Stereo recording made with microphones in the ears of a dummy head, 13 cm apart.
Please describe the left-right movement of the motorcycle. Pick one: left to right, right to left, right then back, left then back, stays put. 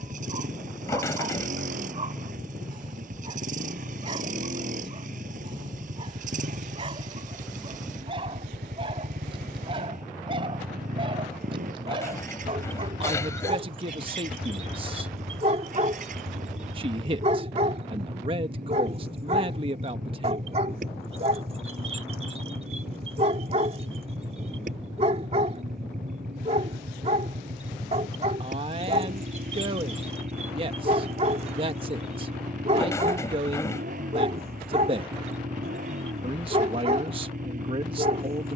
stays put.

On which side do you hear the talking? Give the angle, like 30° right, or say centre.
40° right.